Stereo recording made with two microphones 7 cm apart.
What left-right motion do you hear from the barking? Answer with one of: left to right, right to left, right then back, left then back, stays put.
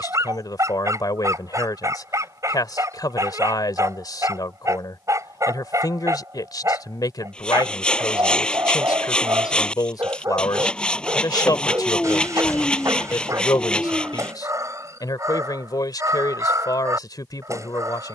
stays put.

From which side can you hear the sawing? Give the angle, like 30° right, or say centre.
10° left.